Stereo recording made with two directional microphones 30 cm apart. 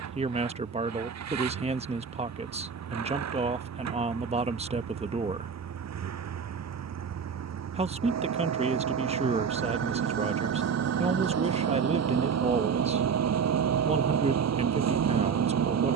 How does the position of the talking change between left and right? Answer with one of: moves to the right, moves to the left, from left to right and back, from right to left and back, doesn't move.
doesn't move.